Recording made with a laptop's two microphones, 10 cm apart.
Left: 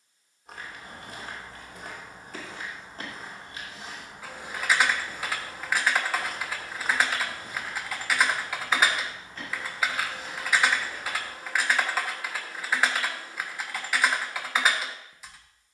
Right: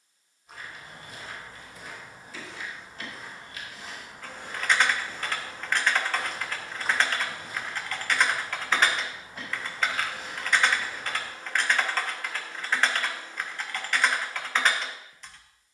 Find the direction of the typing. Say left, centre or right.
centre.